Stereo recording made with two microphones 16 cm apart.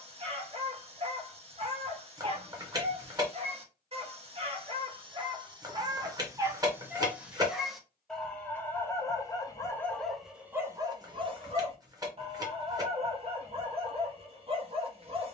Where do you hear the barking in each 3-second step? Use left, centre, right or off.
right, right, centre, centre, right.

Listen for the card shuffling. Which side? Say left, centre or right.
right.